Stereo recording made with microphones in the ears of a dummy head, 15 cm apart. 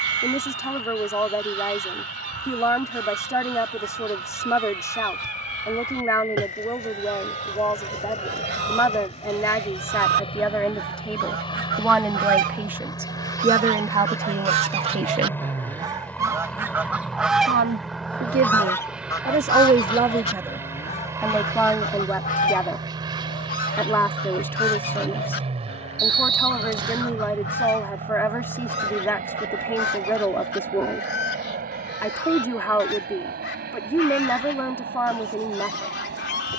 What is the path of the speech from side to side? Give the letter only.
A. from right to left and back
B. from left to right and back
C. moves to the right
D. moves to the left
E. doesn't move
B.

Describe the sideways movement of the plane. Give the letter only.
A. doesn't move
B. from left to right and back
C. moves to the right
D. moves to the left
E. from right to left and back
C.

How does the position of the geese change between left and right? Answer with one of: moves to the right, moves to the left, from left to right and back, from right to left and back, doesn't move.
moves to the left.